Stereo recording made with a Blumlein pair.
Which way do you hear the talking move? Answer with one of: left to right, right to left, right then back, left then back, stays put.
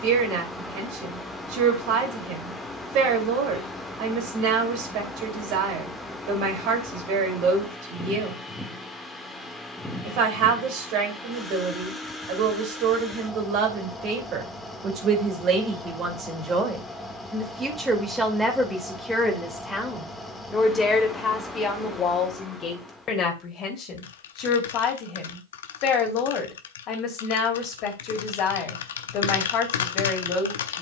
right to left.